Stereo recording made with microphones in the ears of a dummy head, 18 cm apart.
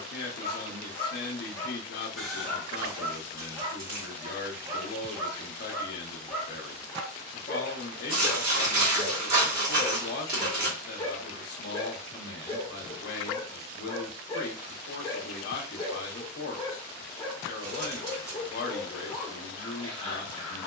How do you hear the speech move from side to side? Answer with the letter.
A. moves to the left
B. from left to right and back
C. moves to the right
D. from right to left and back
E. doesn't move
E.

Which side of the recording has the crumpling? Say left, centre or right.
right.